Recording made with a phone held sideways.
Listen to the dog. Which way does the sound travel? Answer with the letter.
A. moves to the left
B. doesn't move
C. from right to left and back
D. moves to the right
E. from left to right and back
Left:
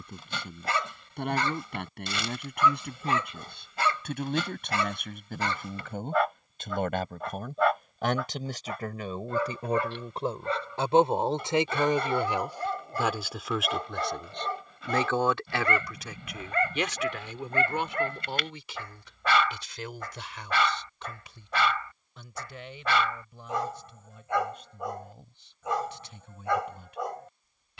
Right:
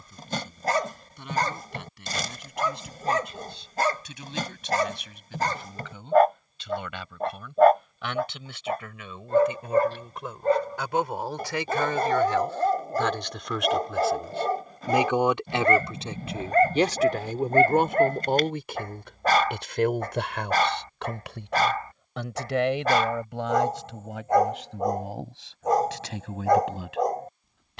B.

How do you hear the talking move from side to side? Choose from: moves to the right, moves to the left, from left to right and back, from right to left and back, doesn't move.
moves to the right.